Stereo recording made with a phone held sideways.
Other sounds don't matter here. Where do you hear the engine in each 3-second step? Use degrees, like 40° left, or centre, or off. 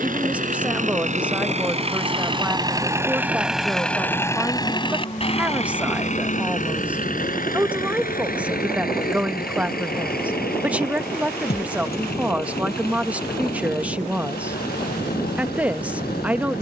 40° right, 20° left, 60° left, 70° left, 80° left, 80° left.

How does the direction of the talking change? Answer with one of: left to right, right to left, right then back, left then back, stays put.
stays put.